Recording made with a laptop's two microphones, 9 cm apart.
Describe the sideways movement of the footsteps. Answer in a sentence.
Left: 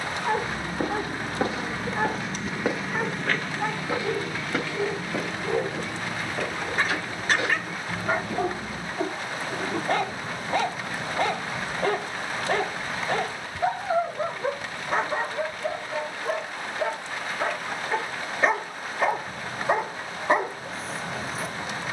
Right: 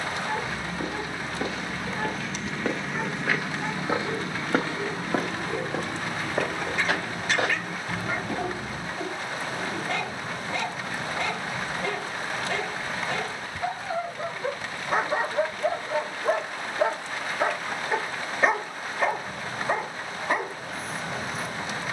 In this clip you hear the footsteps move to the right.